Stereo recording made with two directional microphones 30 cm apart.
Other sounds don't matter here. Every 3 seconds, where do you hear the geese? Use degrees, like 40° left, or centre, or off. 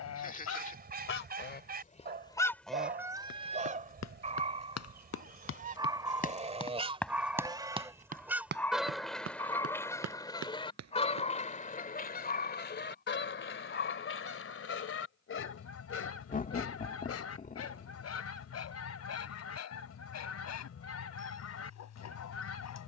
30° left, 30° right, 10° right, 10° left, 40° left, 50° left, 50° left, 50° left.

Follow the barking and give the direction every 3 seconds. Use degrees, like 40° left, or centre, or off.
30° right, 20° right, centre, 20° left, 40° left, 50° left, 60° left, 60° left.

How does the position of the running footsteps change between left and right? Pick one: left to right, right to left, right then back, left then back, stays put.
left to right.